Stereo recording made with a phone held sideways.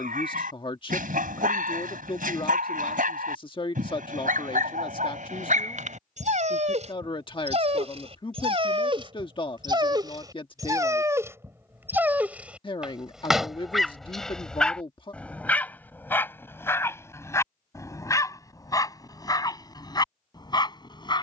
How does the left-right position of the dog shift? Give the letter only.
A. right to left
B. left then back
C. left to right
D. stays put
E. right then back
A.